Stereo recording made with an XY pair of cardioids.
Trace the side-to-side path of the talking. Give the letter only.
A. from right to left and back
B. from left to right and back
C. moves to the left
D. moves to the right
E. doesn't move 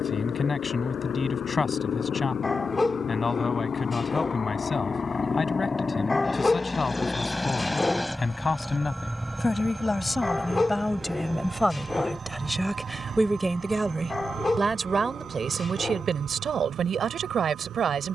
D.